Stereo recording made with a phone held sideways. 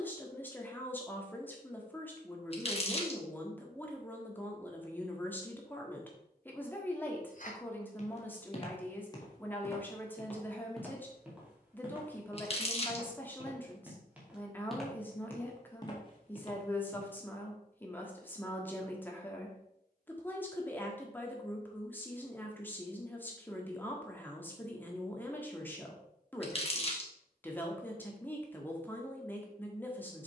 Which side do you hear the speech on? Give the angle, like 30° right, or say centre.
10° left.